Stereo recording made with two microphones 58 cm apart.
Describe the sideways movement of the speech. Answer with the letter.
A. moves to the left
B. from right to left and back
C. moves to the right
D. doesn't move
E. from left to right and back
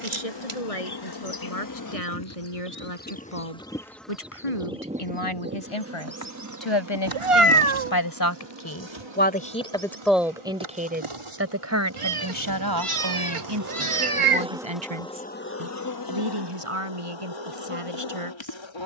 C.